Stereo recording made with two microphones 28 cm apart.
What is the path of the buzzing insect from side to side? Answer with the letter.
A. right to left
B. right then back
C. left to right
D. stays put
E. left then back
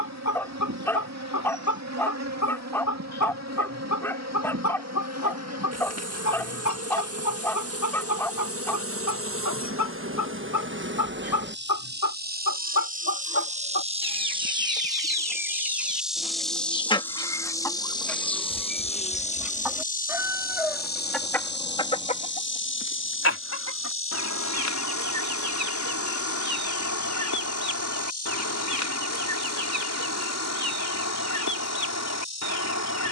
A.